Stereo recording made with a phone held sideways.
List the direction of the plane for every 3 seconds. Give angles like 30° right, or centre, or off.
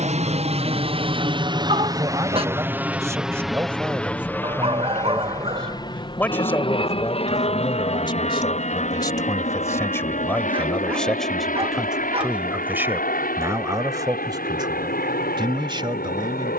30° right, 10° left, 40° left, 50° left, 50° left, 60° left.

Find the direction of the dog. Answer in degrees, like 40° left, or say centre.
30° right.